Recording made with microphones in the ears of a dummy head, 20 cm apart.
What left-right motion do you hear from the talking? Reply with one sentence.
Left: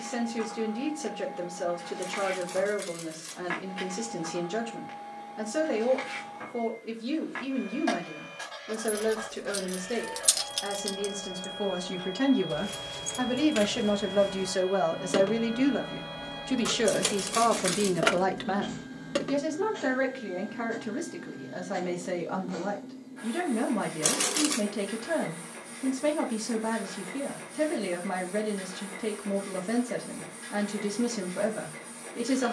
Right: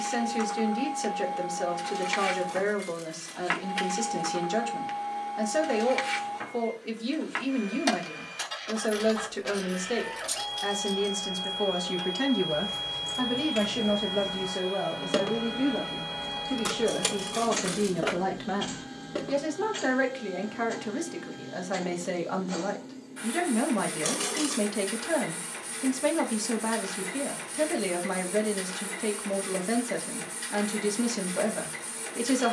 In this clip you hear the talking go left and come back.